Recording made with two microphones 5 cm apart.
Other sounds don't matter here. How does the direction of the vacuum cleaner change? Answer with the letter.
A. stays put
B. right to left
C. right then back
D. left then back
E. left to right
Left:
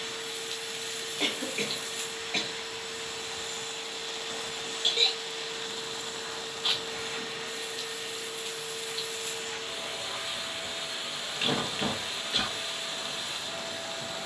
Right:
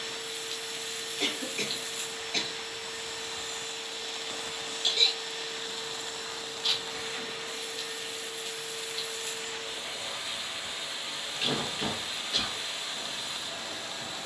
A.